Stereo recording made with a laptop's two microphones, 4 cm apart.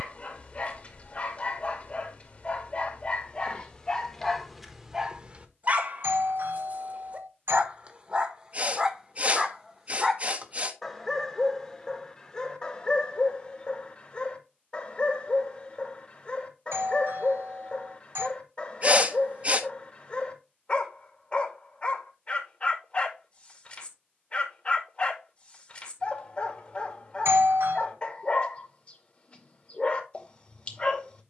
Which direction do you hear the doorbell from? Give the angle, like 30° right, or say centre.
70° right.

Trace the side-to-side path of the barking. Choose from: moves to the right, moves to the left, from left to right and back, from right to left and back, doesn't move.
from left to right and back.